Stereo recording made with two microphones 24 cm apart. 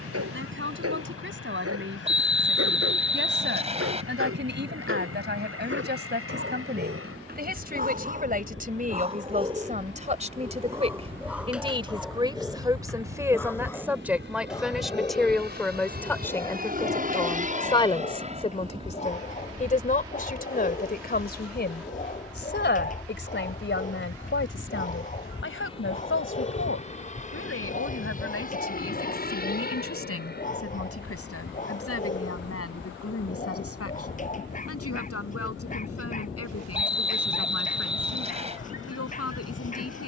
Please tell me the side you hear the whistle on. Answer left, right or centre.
right.